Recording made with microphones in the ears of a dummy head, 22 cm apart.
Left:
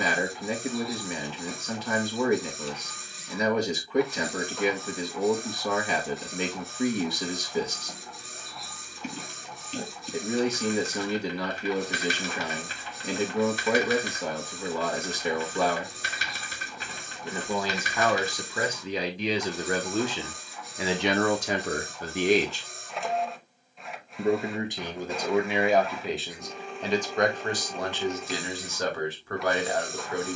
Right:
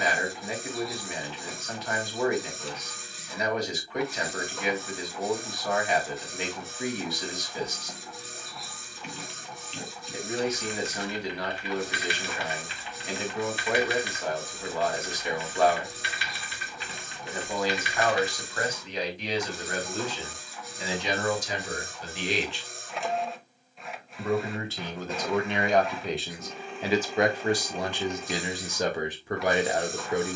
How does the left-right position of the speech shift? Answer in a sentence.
In this clip you hear the speech move from left to right.